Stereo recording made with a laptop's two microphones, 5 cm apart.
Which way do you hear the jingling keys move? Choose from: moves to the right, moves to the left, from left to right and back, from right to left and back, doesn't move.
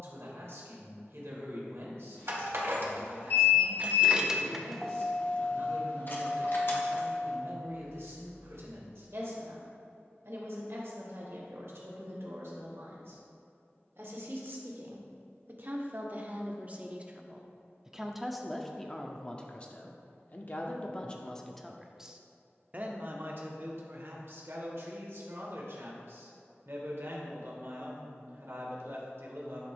moves to the left.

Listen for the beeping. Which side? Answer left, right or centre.
left.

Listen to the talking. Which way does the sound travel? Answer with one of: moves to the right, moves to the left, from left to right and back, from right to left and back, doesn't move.
from right to left and back.